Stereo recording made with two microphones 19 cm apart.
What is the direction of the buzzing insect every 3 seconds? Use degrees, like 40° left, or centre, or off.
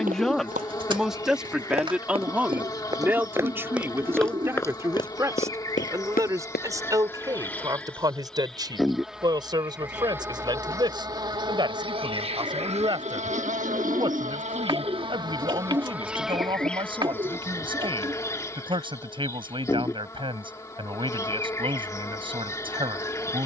20° left, 20° left, 10° left, 10° right, 40° right, centre, 20° left, 20° left.